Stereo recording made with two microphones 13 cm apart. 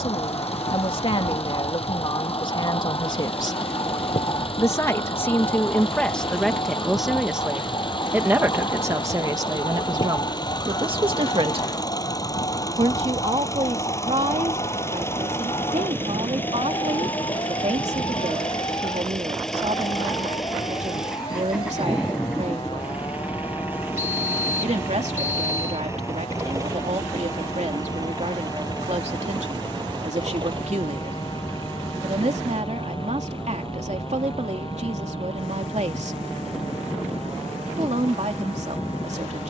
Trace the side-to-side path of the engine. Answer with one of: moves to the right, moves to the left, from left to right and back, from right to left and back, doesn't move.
moves to the right.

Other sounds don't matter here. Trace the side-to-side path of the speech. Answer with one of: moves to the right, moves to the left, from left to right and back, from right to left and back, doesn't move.
moves to the right.